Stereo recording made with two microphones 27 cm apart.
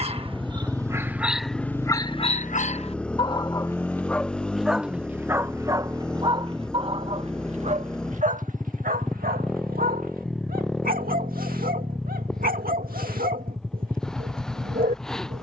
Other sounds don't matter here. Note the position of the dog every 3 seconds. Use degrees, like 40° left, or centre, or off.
centre, centre, 20° right, 30° right, 30° right.